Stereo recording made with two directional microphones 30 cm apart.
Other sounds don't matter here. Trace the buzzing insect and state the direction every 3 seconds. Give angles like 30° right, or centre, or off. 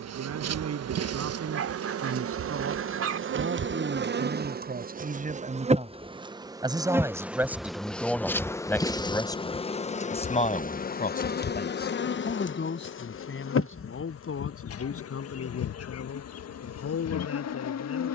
50° right, 30° right, centre, 30° left, 40° left, 60° left.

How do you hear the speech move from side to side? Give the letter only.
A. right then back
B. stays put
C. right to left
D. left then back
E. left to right
C.